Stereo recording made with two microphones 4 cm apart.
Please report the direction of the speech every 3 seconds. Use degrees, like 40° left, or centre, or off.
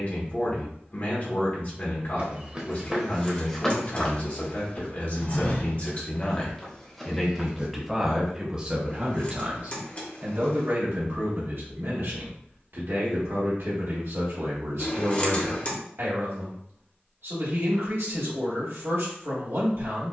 40° left, 40° left, centre, 50° right, 70° right, 70° right, 70° right.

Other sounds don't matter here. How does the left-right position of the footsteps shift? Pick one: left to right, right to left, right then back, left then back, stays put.
left then back.